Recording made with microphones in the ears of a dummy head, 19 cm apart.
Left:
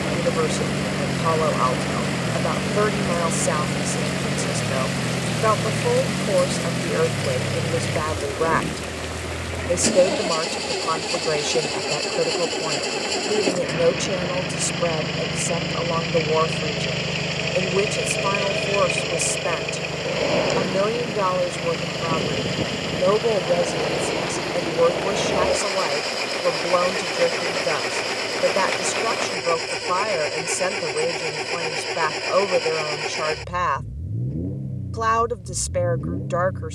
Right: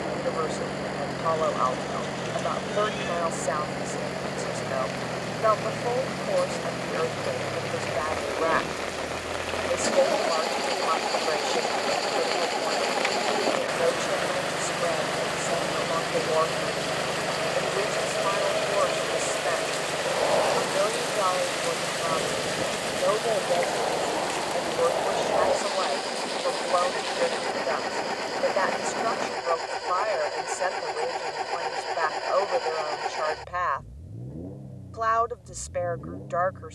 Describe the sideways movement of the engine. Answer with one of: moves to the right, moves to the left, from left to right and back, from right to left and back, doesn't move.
doesn't move.